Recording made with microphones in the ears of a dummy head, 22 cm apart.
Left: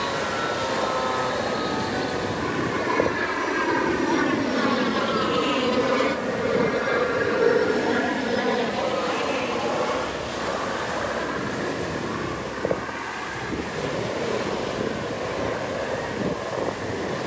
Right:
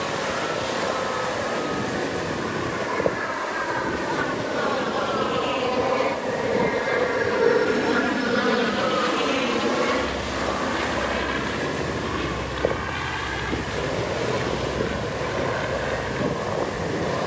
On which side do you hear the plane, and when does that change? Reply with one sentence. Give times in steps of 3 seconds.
You can hear the plane on the left from 0 s, in the centre from 6 s and on the right from 9 s.